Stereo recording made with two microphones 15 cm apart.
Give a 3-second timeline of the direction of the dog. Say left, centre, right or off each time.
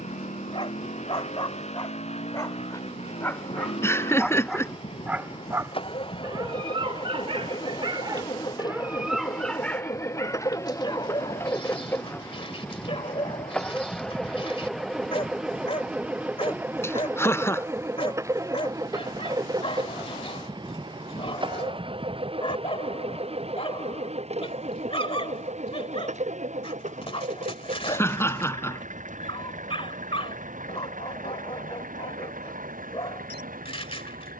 left, centre, right, left, left, left, left, left, left, left, left, left.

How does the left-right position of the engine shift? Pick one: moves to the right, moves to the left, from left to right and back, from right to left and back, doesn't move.
moves to the right.